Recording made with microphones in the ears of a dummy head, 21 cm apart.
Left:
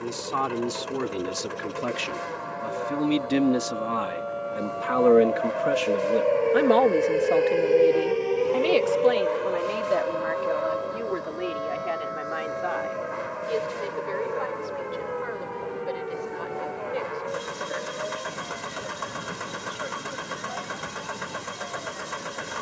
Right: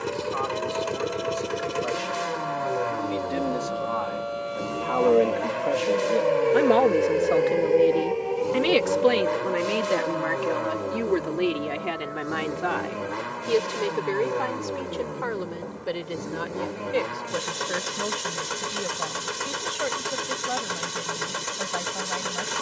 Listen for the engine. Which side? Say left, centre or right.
right.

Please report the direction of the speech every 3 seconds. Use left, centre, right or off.
left, left, centre, right, right, right, right, right.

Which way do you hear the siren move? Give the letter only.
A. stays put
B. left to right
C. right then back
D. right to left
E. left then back
D.